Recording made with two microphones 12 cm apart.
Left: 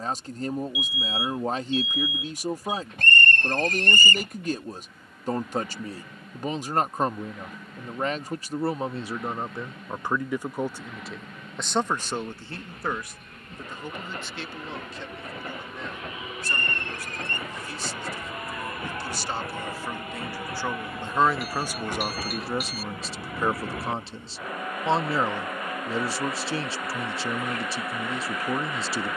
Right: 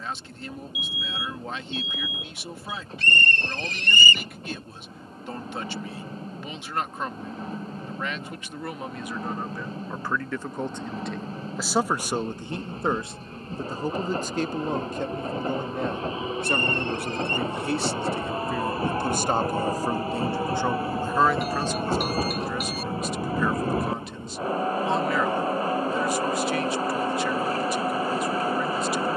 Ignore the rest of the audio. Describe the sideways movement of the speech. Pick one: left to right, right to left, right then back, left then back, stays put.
right then back.